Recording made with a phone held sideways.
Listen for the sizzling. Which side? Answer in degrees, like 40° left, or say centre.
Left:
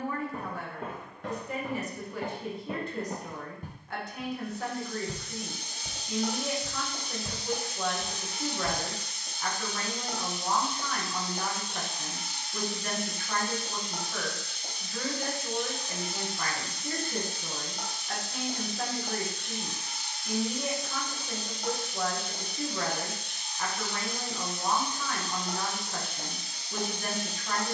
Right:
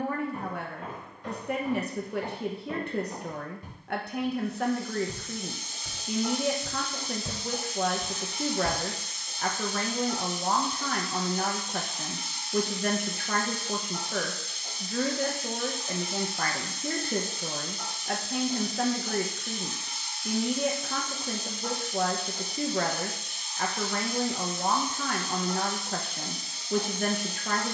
60° left.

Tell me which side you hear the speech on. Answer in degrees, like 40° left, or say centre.
60° right.